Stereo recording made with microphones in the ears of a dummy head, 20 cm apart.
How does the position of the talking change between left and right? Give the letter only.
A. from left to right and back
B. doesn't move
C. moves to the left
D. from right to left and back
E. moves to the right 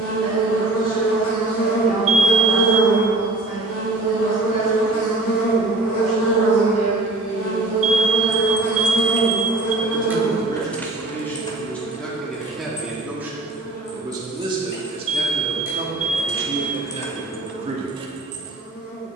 E.